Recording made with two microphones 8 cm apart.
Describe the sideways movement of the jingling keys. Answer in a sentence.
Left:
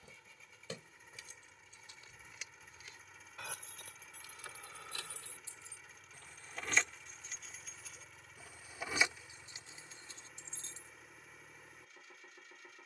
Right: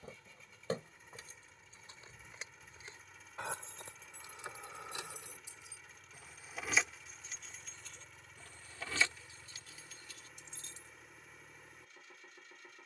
You can hear the jingling keys travel towards the left.